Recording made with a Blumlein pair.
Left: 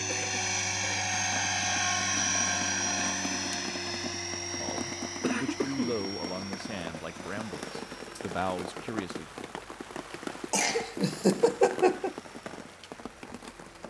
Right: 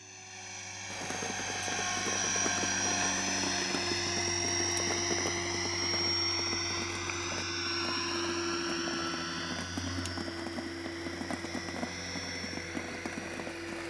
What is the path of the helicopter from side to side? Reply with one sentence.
In this clip you hear the helicopter move from left to right.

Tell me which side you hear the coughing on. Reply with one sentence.
You can hear the coughing on the left.